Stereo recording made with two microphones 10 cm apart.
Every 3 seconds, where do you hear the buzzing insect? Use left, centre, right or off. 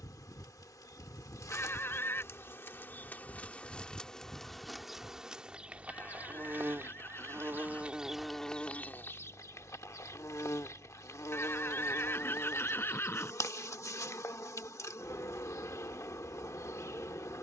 left, centre, centre, left, left, left.